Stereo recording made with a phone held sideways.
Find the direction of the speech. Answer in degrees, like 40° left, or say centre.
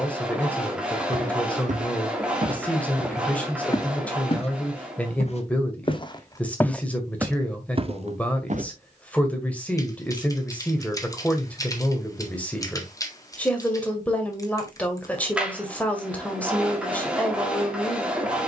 10° left.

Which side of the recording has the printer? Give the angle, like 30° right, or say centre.
10° right.